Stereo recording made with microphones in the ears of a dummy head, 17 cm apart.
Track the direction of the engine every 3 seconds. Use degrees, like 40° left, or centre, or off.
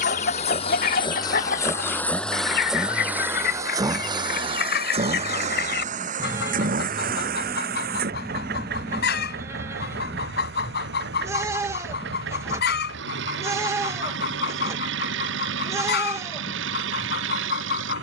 20° left, 30° right, 50° right, 60° right, 60° right, 70° right.